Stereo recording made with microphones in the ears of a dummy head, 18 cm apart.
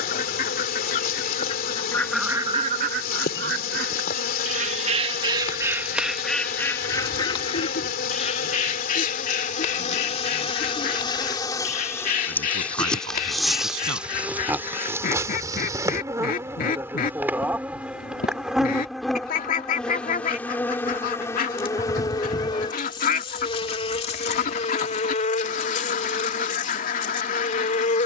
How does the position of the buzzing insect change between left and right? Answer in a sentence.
In this clip you hear the buzzing insect move from left to right and back again.